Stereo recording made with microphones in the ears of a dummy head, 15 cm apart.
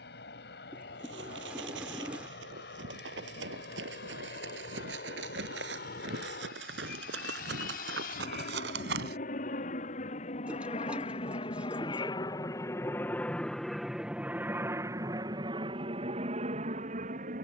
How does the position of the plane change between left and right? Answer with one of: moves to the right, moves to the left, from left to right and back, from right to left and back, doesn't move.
moves to the right.